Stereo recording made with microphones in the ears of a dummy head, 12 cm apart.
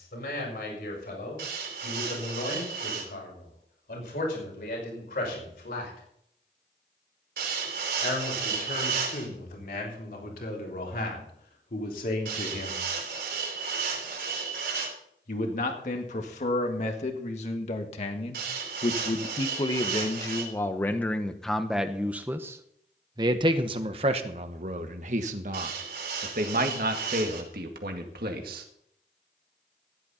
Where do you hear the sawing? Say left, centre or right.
right.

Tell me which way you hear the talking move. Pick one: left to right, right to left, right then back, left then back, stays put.
left to right.